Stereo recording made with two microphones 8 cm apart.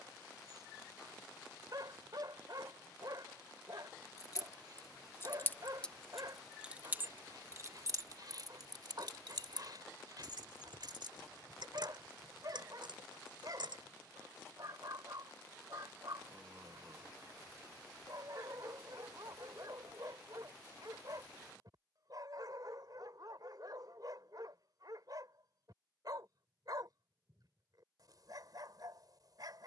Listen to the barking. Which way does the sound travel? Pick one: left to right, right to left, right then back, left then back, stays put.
stays put.